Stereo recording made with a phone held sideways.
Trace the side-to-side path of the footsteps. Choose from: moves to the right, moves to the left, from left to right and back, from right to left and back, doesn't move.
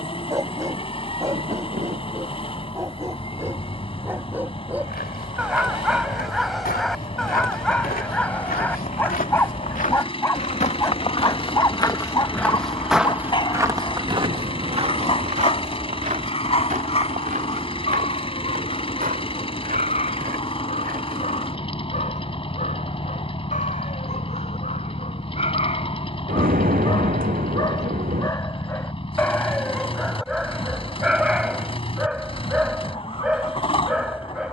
moves to the right.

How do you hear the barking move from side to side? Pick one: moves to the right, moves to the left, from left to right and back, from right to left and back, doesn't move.
from right to left and back.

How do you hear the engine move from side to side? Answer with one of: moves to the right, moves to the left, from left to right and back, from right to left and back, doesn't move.
doesn't move.